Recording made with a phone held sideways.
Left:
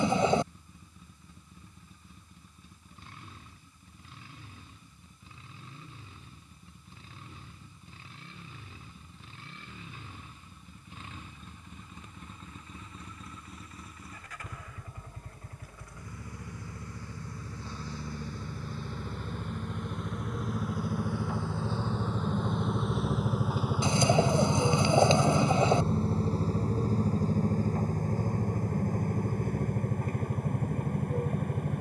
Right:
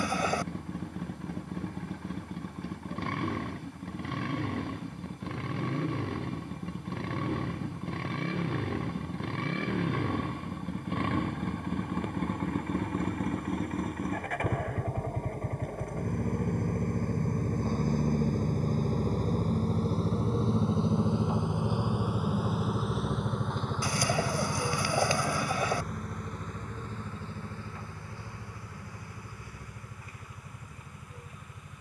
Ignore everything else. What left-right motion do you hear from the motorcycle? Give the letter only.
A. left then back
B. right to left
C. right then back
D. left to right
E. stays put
B.